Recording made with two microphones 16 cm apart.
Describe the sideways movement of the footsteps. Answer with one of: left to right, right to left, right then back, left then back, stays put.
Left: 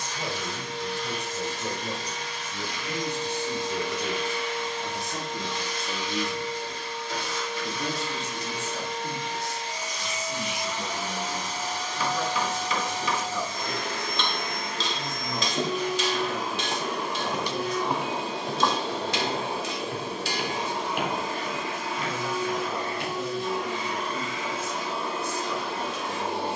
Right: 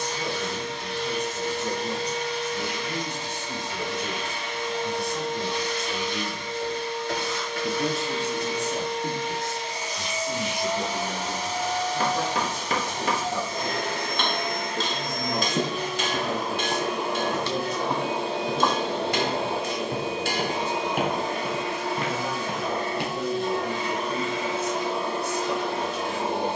left then back.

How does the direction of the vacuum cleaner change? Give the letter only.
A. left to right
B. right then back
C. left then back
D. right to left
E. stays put
E.